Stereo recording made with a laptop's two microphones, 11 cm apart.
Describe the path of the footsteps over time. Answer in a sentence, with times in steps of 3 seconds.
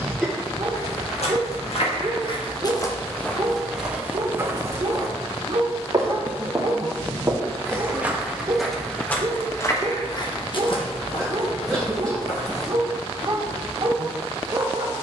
You can hear the footsteps on the left from 0 s, in the centre from 3 s and on the left from 9 s.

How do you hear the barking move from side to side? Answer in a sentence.
In this clip you hear the barking stay put.